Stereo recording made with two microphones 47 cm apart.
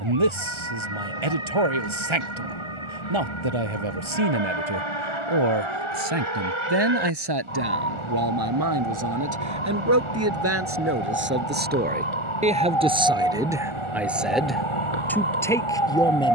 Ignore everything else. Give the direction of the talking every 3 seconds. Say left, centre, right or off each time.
right, right, right, right, centre, centre.